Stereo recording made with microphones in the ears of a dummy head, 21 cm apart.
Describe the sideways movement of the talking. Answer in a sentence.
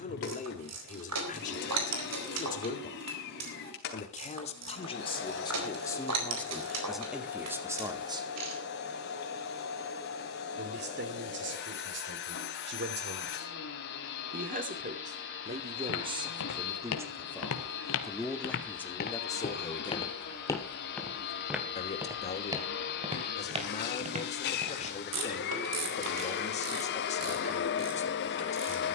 You can hear the talking go right and come back.